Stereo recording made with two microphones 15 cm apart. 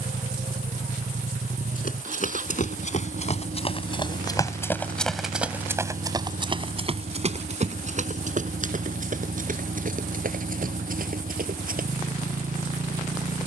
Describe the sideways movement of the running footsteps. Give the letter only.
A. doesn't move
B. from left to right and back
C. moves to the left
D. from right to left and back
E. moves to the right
E.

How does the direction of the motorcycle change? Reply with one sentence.
In this clip you hear the motorcycle stay put.